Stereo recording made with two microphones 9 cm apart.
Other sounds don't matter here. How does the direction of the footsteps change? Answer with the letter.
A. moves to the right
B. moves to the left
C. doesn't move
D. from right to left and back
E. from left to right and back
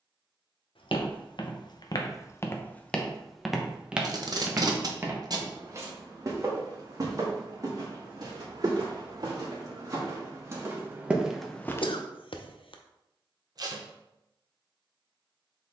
E.